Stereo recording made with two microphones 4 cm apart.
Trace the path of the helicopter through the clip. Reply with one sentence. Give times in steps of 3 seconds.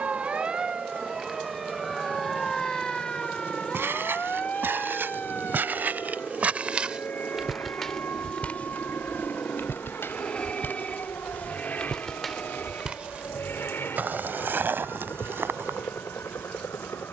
In this clip you hear the helicopter on the right from 0 s, in the centre from 6 s and on the left from 9 s.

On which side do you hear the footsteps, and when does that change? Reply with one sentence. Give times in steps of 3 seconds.
In this clip you hear the footsteps not at all from 0 s, on the right from 3 s, in the centre from 6 s, on the left from 9 s and on the right from 12 s.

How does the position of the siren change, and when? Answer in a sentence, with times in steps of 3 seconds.
In this clip you hear the siren in the centre from 0 s and on the left from 3 s.